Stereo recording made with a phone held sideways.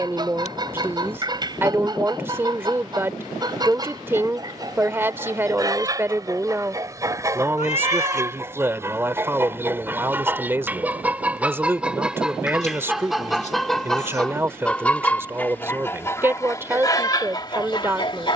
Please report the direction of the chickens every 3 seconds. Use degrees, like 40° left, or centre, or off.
30° right, 30° right, 20° right, 10° right, centre, 20° left.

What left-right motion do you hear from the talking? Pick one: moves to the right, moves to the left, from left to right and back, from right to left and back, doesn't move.
doesn't move.